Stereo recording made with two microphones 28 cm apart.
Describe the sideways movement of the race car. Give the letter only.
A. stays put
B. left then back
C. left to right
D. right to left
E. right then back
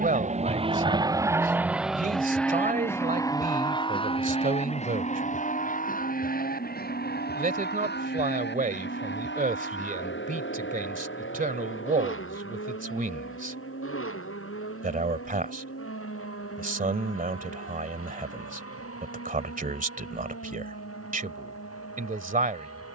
D.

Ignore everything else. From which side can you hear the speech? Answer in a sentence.
In this clip you hear the speech on the right.